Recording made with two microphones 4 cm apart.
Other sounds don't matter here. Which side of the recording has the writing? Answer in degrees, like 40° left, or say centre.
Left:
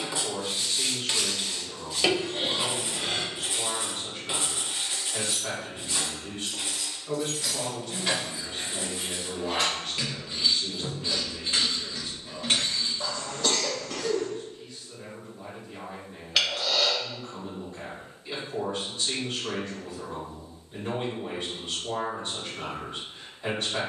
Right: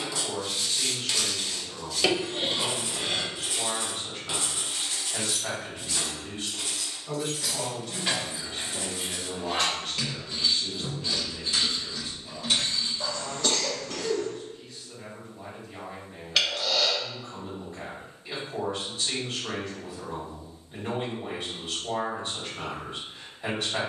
20° left.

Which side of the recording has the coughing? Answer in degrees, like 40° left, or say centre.
centre.